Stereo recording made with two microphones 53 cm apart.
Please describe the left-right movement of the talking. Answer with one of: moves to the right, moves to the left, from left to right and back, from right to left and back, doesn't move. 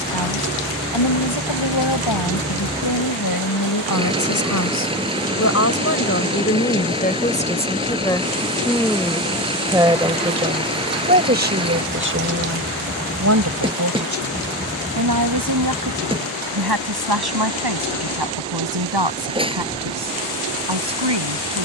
moves to the right.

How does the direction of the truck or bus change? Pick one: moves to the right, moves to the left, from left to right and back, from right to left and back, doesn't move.
doesn't move.